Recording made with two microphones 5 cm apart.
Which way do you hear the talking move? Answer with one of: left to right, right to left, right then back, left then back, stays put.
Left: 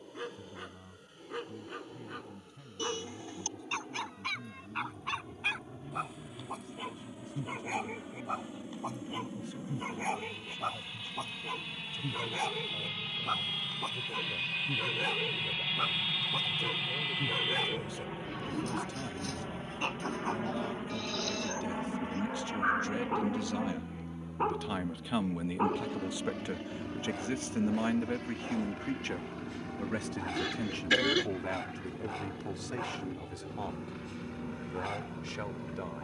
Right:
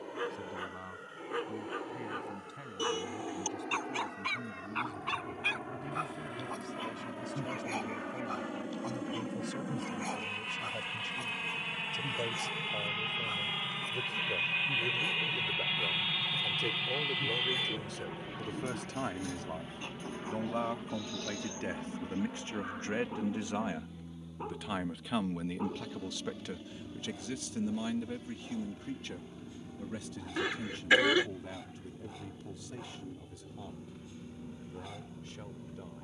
right to left.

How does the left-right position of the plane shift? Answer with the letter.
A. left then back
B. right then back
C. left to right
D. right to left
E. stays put
D.